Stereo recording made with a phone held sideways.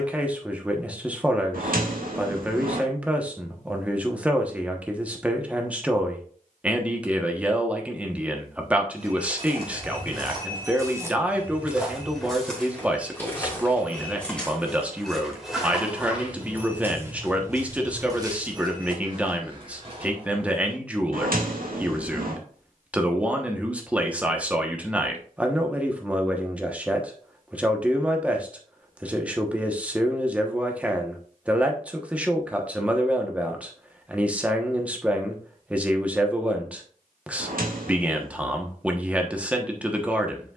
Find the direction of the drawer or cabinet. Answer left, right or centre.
right.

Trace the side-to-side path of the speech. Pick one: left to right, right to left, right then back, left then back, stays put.
stays put.